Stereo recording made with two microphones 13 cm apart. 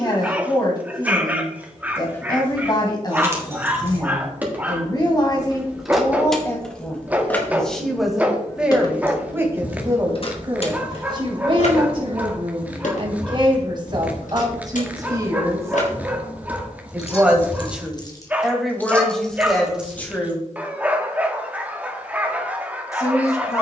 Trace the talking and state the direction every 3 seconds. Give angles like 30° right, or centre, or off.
30° left, 30° left, 10° left, 30° right, 40° right, 20° right, 10° left, 20° left.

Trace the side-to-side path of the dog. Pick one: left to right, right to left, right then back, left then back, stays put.
stays put.